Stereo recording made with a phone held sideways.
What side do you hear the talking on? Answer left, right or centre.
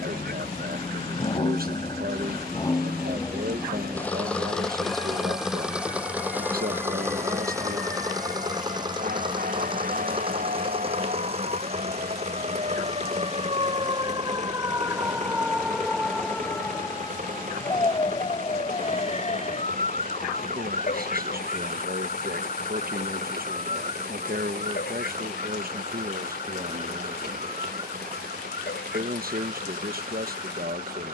right.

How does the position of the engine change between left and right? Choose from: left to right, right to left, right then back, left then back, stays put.
left to right.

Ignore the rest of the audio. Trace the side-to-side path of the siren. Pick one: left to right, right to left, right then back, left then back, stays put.
right to left.